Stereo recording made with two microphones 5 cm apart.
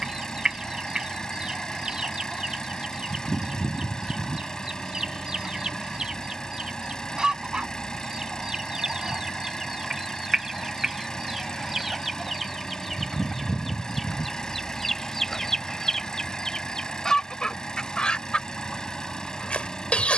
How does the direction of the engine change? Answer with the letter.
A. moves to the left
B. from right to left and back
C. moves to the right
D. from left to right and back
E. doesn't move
E.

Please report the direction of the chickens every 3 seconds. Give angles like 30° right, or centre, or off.
20° right, 20° right, 20° right, 10° right, centre, 10° left, 20° left.